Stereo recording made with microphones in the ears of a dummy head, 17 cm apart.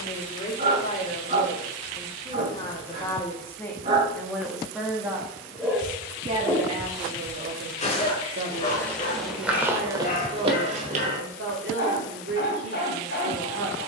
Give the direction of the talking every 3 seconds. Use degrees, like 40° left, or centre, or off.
30° left, centre, 40° right, 60° right, 60° right.